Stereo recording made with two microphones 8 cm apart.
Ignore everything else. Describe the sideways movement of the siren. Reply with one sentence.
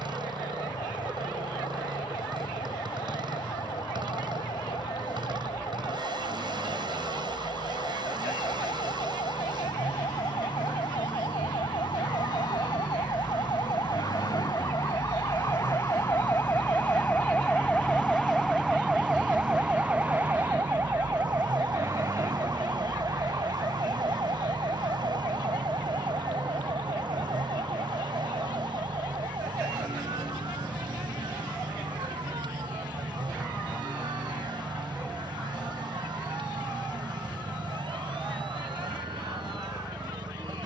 You can hear the siren travel towards the right.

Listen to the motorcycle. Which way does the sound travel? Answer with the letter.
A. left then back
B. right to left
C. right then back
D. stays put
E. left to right
D.